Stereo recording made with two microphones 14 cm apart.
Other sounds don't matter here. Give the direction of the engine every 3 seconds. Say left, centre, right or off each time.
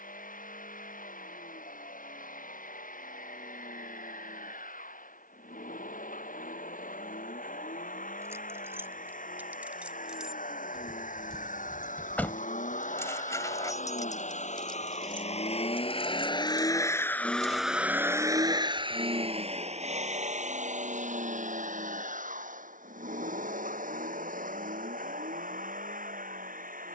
left, left, left, left, left, left, right, right, right.